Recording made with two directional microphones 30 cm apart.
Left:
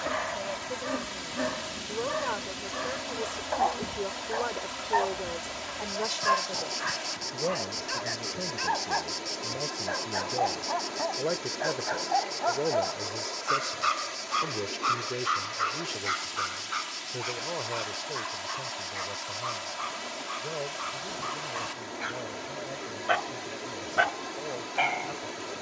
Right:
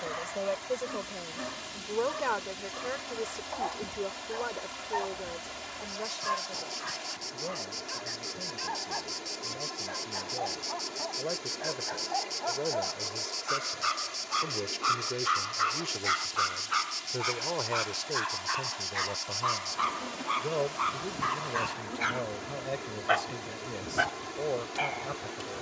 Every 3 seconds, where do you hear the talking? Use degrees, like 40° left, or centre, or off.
30° right, 20° left, 50° left, 40° left, 20° left, 10° right, 30° right, 40° right, 40° right.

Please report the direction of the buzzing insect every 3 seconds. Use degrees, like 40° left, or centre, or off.
50° left, 40° left, 20° left, centre, 10° right, 30° right, 40° right, 50° right, 50° right.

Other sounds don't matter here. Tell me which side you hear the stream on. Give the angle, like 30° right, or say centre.
30° left.